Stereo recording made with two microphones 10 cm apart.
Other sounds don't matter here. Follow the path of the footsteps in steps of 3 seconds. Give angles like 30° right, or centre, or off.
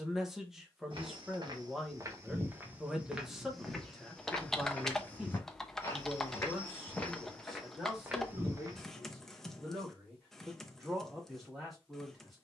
30° right, 10° left, centre, off.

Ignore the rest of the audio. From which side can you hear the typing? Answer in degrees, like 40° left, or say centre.
centre.